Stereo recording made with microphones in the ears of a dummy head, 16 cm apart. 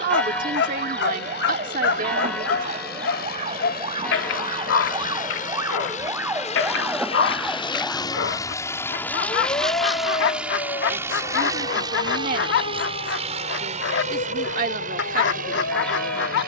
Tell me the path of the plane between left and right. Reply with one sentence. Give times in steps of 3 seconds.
You can hear the plane on the left from 0 s, in the centre from 9 s and on the right from 12 s.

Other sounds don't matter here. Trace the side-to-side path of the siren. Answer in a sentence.
In this clip you hear the siren move to the left.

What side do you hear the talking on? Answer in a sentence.
In this clip you hear the talking on the right.